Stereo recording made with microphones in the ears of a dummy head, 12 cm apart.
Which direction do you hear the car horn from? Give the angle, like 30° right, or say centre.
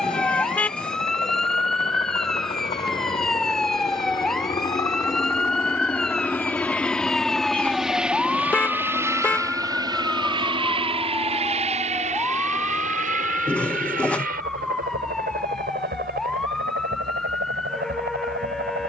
10° left.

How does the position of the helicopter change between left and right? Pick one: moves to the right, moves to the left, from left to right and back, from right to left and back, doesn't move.
moves to the right.